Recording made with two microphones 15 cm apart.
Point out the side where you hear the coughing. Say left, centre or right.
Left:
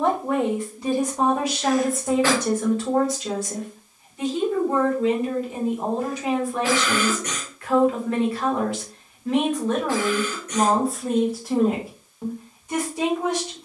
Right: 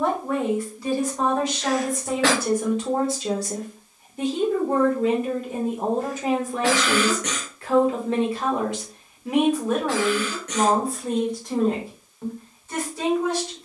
right.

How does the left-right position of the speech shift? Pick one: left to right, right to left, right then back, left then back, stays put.
right then back.